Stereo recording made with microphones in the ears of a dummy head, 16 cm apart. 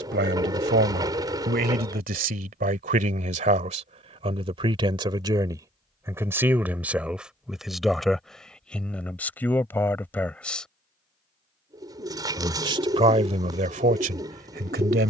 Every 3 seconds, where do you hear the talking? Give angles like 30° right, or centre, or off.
60° right, 30° right, 10° right, 10° left, 40° right.